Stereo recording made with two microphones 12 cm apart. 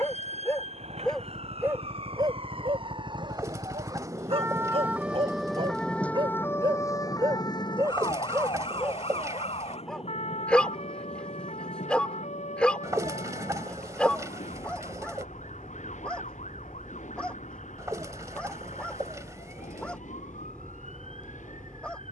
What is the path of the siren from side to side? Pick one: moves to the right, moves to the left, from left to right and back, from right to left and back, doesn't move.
moves to the left.